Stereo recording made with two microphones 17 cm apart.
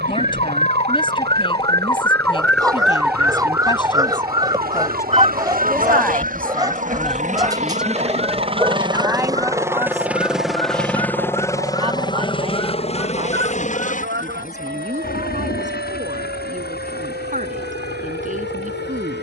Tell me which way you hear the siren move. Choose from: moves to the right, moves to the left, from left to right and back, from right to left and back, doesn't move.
moves to the right.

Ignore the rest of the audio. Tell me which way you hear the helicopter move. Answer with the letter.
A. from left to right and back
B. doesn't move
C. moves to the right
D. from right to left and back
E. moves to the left
E.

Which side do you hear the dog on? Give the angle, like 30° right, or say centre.
20° right.